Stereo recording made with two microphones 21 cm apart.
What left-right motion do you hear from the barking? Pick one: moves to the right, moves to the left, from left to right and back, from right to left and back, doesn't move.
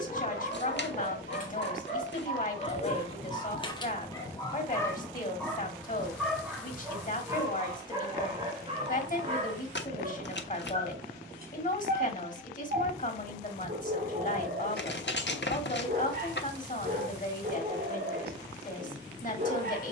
moves to the right.